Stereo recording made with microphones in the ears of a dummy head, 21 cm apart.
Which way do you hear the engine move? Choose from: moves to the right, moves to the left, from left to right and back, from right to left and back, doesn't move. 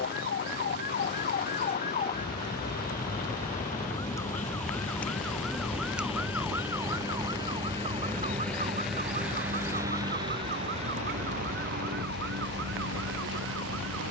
moves to the right.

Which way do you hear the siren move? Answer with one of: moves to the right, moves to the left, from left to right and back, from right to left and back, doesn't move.
moves to the right.